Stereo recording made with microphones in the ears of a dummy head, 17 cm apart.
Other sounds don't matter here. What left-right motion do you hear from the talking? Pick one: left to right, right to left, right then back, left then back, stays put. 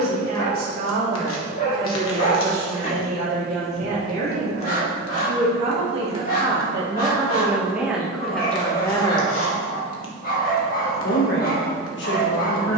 right to left.